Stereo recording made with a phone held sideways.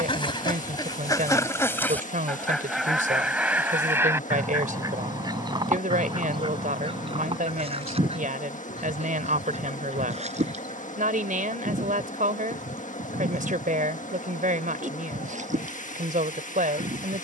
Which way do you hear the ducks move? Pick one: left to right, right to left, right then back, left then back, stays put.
left to right.